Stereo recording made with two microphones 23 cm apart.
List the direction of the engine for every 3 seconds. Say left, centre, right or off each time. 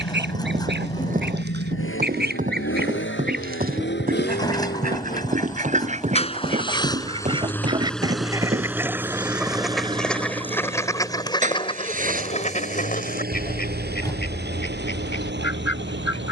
left, left, centre, right, right, right.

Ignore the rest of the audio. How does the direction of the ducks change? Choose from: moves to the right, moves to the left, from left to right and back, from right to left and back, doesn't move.
moves to the left.